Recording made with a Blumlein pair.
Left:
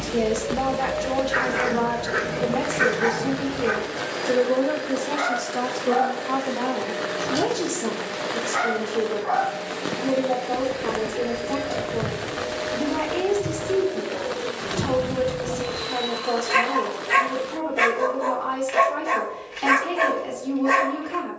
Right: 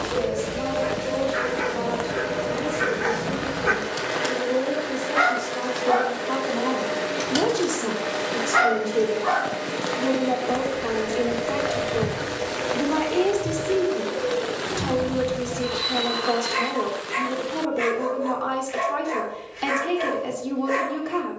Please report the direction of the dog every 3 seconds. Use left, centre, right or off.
left, right, right, right, left, left, left.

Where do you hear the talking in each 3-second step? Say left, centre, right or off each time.
left, left, centre, centre, centre, centre, centre.